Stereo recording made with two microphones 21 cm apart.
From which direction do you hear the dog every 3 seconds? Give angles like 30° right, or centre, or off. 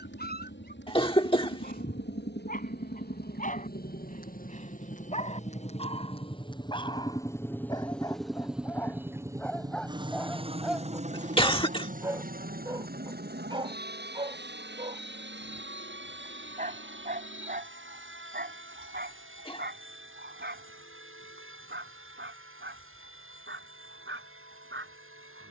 40° left, 30° left, 20° left, centre, 20° right, 40° right, 50° right, 60° right, 60° right.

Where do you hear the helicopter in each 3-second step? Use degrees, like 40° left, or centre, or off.
60° left, 40° left, 10° left, 30° right, 50° right, 60° right, 70° right, 70° right, 70° right.